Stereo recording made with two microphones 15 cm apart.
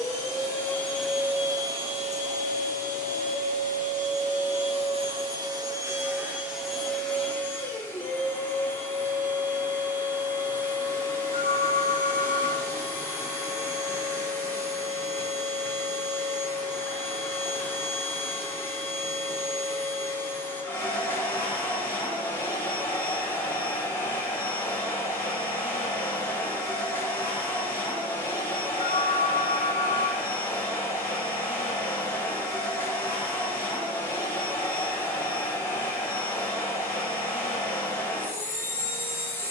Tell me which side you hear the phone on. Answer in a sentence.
You can hear the phone on the left.